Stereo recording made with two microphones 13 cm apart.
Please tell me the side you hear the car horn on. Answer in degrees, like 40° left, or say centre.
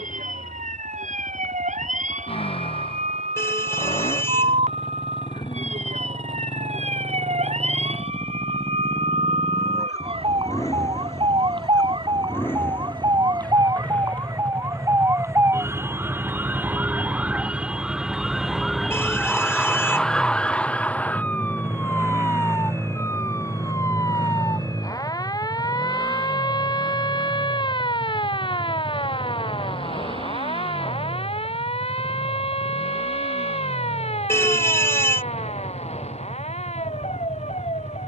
20° left.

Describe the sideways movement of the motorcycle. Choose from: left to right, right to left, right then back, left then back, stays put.
left to right.